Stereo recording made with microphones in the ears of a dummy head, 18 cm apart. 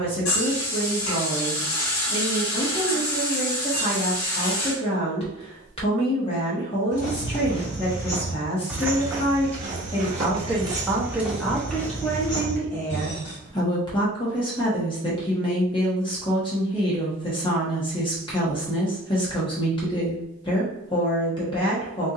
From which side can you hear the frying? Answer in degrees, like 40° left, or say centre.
80° left.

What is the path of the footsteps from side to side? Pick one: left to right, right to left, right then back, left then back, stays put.
right then back.